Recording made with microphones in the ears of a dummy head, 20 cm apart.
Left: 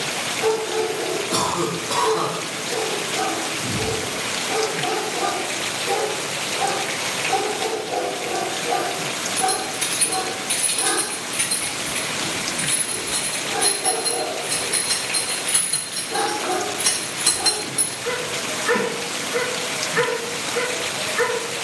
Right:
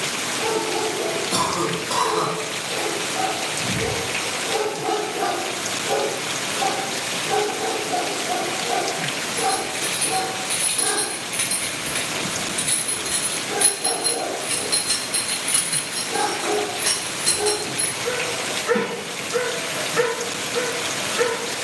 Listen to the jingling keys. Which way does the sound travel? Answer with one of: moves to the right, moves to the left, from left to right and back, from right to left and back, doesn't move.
from left to right and back.